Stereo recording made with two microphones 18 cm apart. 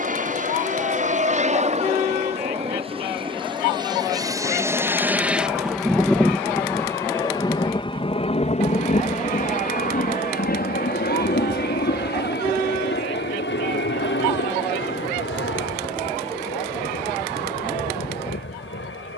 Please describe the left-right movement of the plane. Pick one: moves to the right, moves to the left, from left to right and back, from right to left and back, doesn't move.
moves to the left.